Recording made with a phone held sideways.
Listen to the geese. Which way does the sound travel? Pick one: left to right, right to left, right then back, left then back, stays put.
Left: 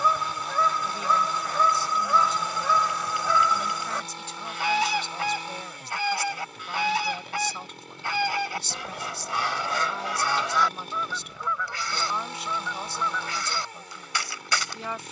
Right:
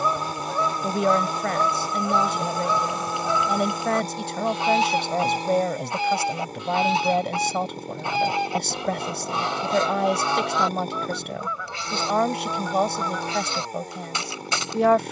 stays put.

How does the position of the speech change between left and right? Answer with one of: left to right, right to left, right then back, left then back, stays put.
stays put.